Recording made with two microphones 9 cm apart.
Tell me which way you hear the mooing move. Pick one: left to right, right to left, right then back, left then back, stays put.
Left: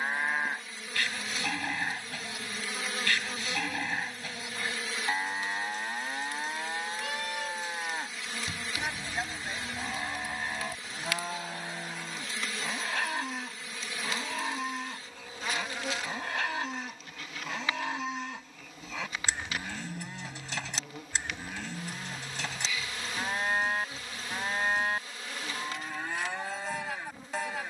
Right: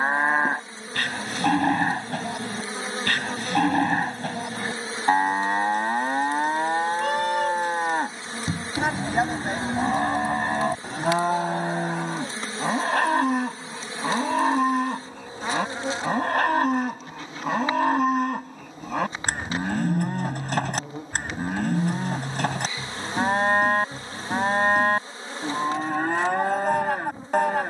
stays put.